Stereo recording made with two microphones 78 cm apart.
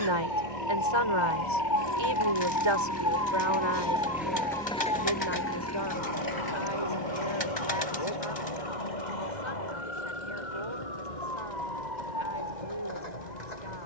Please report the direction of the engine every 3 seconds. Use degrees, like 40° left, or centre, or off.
40° right, centre, 40° left, 60° left, 60° left.